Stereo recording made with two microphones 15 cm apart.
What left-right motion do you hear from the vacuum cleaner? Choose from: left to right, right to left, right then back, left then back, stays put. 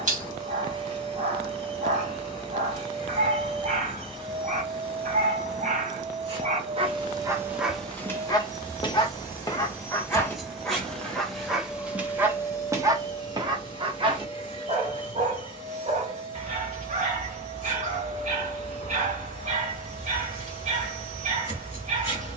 right to left.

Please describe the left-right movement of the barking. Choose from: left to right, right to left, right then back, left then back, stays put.
left then back.